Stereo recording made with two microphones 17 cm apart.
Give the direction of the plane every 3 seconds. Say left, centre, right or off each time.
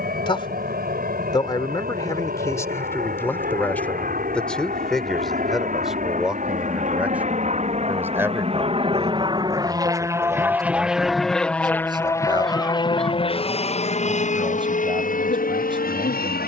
right, right, right, centre, left, left.